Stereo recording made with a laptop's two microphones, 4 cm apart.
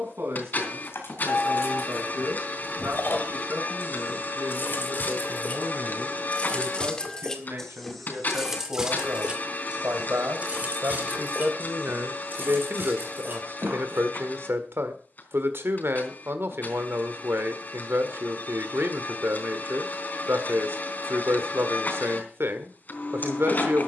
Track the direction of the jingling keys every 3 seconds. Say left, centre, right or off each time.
left, left, centre, right, right, off, off, off.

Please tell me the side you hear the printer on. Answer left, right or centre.
left.